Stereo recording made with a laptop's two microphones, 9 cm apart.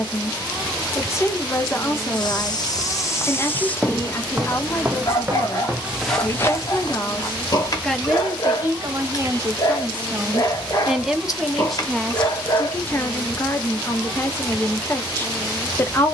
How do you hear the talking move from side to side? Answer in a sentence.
You can hear the talking move from left to right and back again.